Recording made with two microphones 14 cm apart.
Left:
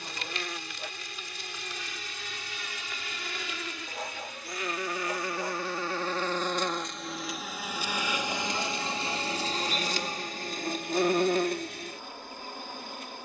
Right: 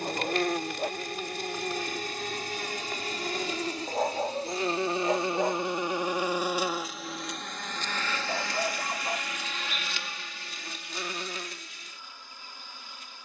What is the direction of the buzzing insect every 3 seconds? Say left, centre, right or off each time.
right, right, centre, left, left.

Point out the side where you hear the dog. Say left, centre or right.
right.